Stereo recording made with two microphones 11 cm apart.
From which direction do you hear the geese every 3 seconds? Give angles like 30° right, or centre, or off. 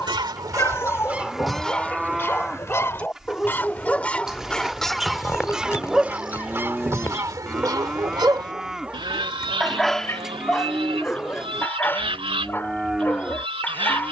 centre, 10° left, 30° right, 60° right, 60° right.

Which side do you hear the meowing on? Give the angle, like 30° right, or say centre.
30° left.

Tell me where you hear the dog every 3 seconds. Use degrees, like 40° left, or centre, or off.
20° left, centre, 20° right, 10° left, 20° left.